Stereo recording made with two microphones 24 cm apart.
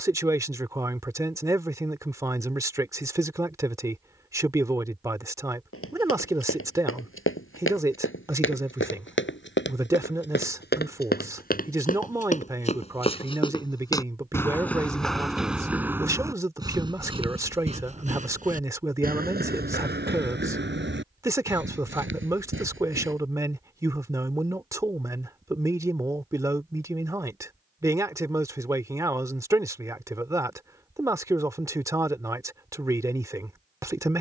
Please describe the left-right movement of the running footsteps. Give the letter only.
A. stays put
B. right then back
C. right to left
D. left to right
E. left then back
D.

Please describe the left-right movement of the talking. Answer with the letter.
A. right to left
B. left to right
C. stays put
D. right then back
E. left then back
C.